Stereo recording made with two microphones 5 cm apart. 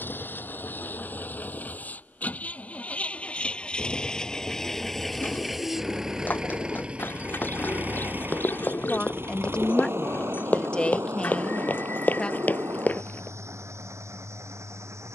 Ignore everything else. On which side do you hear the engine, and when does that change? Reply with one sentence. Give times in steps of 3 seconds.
You can hear the engine on the left from 0 s, in the centre from 3 s and on the right from 6 s.